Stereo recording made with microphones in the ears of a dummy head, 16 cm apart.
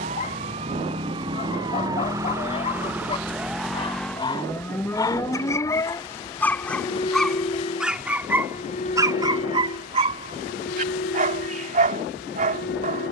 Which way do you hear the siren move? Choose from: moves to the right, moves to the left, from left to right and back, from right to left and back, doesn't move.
moves to the left.